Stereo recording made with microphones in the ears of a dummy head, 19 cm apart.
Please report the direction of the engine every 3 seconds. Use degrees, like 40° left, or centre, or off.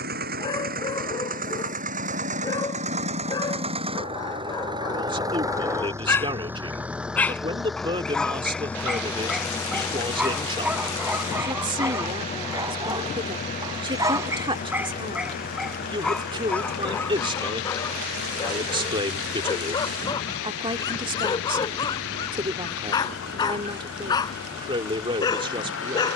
40° right, 20° right, centre, 20° left, 30° left, 40° left, 50° left, 60° left, 60° left.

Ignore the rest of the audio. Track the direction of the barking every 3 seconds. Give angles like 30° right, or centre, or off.
20° left, 20° left, centre, 10° right, 10° right, 10° left, 20° left, 20° left, 20° left.